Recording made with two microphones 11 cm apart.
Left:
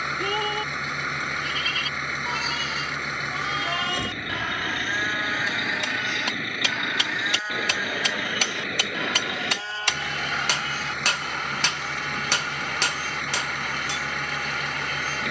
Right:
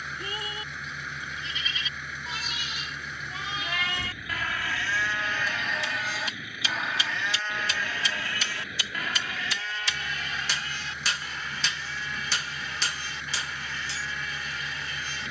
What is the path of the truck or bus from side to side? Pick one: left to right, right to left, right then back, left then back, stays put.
stays put.